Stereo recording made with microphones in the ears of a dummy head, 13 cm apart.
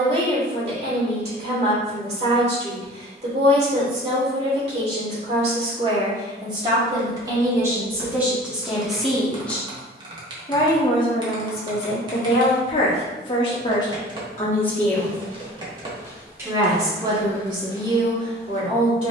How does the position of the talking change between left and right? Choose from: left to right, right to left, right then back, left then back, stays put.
left then back.